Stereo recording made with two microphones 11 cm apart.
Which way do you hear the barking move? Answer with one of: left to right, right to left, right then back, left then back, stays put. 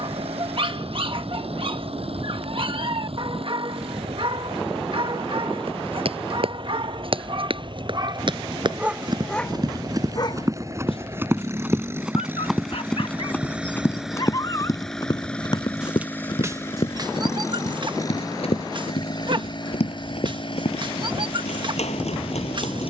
left then back.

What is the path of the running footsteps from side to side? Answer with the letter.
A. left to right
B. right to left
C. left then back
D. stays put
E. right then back
B.